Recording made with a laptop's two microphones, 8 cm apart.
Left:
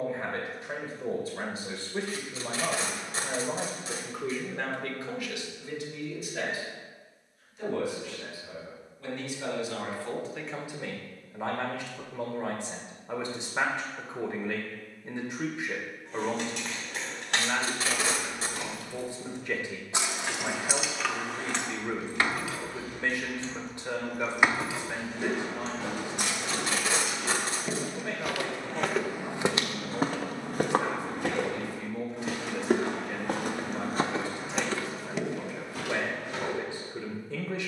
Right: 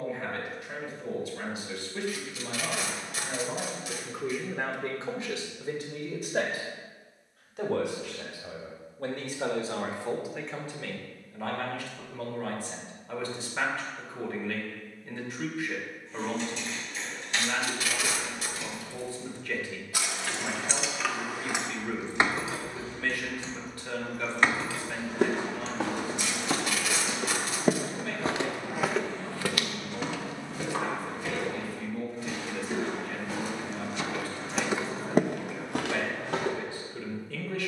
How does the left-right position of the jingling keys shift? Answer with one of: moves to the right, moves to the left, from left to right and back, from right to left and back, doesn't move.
from left to right and back.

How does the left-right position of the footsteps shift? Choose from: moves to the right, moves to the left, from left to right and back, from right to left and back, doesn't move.
from right to left and back.